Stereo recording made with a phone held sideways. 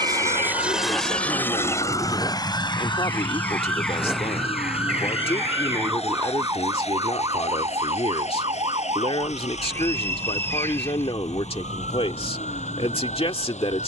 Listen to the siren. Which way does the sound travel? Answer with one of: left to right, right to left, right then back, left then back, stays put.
left to right.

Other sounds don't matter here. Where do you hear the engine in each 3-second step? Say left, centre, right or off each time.
centre, left, left, left, left.